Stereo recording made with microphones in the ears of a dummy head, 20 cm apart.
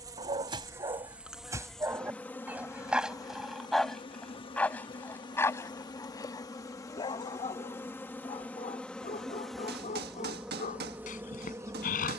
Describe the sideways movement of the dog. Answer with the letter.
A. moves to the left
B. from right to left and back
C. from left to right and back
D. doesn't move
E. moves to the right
A.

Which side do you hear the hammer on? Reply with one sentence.
You can hear the hammer on the right.